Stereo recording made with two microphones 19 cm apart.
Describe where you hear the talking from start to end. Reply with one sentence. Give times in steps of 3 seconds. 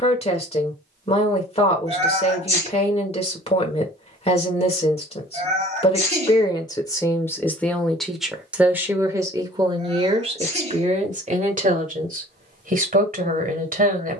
You can hear the talking on the left from 0 s, in the centre from 6 s and on the right from 9 s.